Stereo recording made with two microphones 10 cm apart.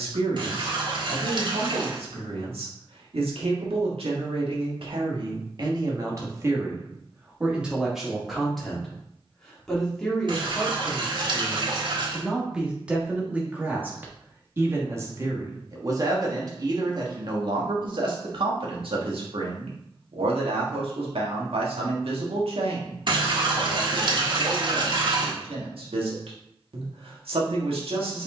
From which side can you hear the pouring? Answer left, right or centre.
right.